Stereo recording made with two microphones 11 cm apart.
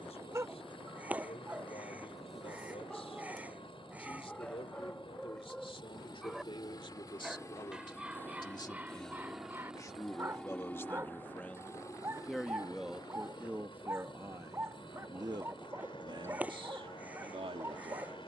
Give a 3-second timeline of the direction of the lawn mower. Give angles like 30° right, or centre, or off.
50° left, 50° left, 30° left, 10° left, 40° left, 50° left.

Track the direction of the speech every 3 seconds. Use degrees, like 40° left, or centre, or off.
60° left, 50° left, 40° left, 20° left, 10° right, 50° right.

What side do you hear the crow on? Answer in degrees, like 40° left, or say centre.
10° right.